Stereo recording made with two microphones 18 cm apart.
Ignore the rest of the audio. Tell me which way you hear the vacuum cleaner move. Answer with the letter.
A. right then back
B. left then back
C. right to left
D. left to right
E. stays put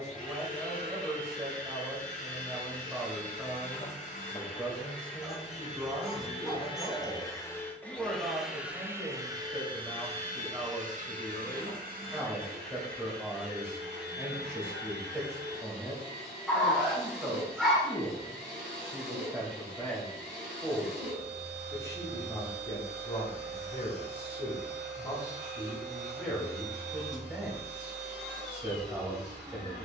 D.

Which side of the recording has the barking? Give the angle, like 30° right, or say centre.
centre.